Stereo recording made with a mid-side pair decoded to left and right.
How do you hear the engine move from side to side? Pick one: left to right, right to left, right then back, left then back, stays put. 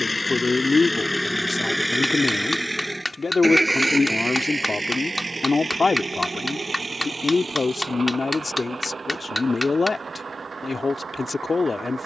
left to right.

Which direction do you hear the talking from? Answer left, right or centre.
left.